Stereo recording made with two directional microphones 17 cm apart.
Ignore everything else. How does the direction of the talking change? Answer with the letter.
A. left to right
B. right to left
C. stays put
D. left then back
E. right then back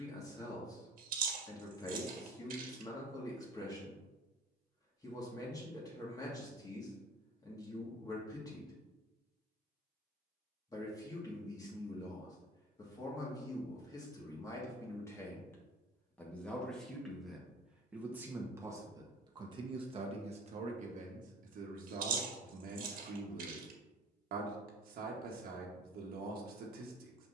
A.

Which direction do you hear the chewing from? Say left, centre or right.
right.